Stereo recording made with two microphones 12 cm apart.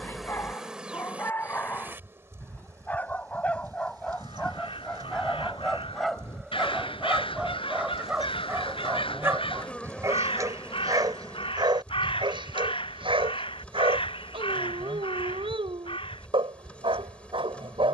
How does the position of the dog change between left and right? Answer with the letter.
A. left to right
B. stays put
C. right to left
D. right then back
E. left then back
A.